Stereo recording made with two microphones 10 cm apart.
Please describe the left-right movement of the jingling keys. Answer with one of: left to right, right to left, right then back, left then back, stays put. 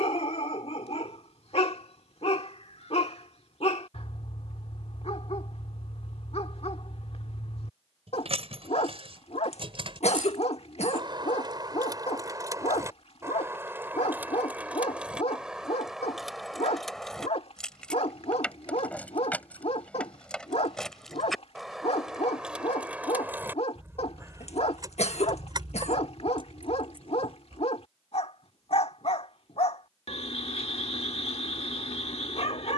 left then back.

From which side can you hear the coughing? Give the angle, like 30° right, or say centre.
80° left.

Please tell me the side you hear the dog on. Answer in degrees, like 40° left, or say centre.
70° left.